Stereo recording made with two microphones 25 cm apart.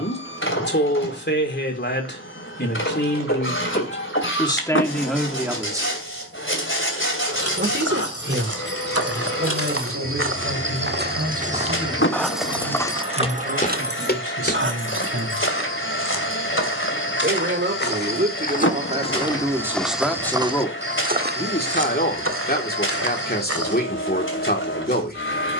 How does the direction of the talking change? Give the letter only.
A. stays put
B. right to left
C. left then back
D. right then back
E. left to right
D.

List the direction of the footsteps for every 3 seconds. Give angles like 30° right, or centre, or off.
off, off, 70° right, 50° right, 20° left, 50° left, 10° left, 60° right, off.